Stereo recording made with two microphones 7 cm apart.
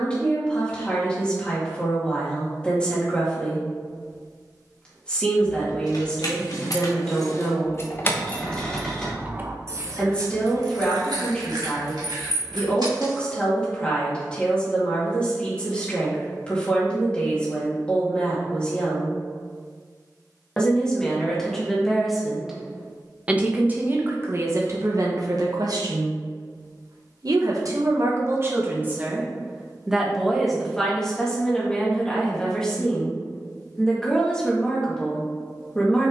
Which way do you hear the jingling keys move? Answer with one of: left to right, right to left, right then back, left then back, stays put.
left to right.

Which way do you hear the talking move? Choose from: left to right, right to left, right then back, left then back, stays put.
right then back.